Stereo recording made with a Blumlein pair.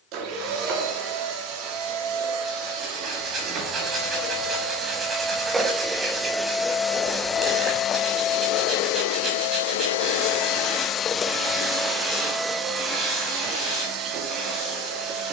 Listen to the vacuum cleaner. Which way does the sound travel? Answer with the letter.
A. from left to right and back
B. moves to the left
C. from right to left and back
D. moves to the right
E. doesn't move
C.